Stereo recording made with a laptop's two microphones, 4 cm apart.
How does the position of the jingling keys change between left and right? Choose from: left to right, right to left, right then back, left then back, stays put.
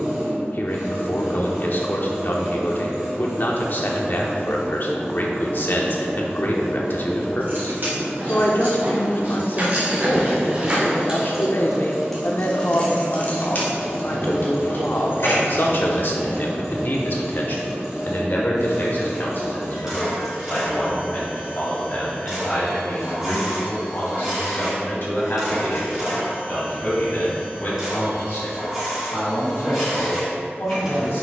right to left.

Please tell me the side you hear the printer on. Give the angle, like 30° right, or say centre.
10° right.